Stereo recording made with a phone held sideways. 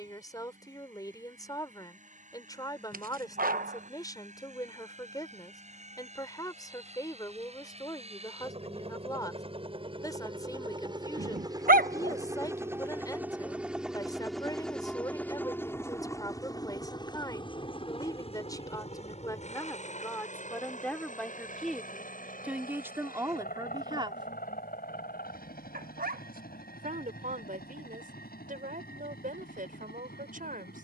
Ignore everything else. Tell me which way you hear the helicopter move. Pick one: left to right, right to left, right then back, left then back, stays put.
right to left.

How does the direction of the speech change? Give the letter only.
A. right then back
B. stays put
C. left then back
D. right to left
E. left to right
E.